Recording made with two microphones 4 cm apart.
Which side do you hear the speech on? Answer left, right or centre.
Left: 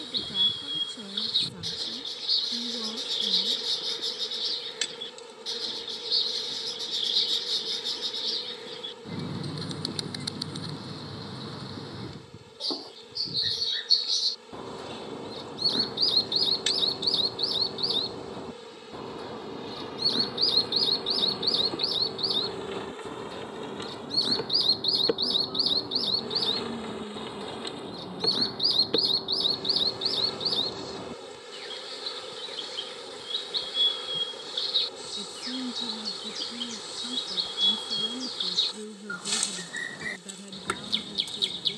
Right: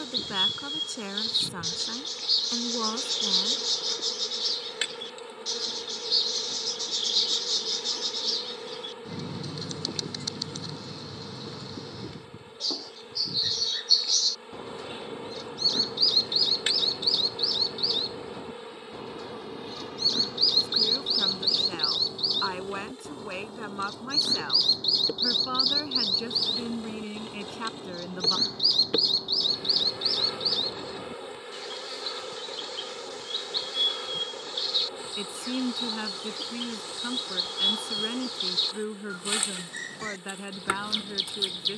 right.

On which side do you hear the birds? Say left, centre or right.
centre.